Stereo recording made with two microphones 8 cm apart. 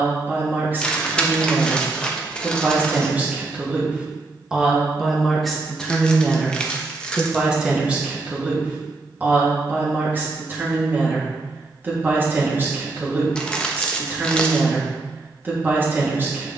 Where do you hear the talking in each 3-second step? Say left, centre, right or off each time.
right, centre, centre, right, right, right.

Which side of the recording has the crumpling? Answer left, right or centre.
centre.